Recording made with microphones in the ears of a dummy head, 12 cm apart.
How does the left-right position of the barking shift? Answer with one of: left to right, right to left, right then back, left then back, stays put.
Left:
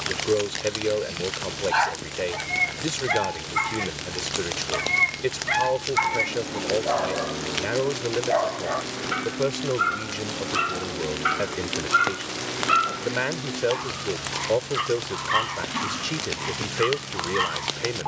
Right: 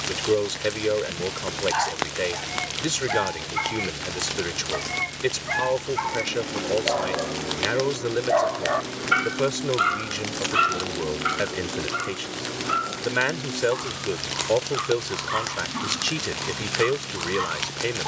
right then back.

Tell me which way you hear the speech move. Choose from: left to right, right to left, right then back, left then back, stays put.
stays put.